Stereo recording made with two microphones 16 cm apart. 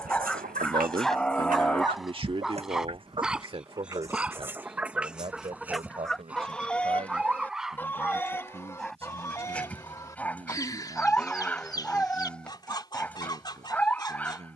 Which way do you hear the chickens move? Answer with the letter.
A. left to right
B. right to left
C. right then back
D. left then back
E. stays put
B.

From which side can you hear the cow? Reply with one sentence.
You can hear the cow in the centre.